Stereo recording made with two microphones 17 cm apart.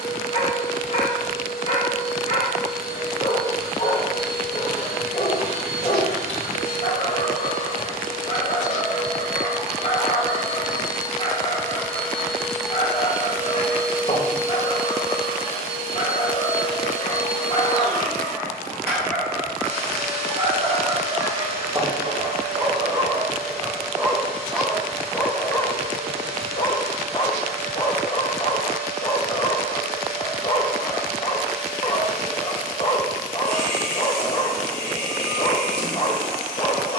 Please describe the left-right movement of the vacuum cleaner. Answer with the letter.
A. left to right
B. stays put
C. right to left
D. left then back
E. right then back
A.